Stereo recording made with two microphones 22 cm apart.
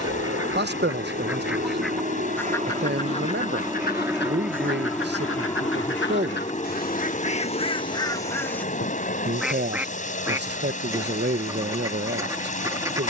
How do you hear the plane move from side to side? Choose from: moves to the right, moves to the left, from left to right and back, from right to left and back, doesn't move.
moves to the left.